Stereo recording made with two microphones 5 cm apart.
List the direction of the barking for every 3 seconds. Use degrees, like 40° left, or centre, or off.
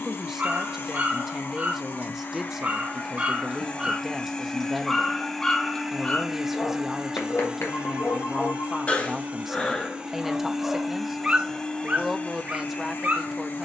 40° right, centre, 30° left, centre, 40° right.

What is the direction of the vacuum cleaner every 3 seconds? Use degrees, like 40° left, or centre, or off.
50° left, 20° left, 20° right, 10° right, 40° left.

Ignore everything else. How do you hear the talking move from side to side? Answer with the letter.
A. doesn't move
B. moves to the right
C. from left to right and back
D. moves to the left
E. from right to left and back
A.